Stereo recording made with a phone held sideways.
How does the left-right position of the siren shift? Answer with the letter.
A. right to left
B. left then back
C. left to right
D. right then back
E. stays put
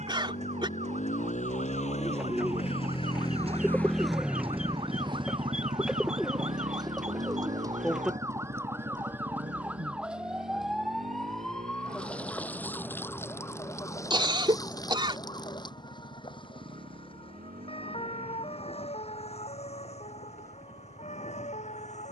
A.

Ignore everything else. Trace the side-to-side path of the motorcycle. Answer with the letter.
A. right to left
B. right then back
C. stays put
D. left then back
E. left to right
E.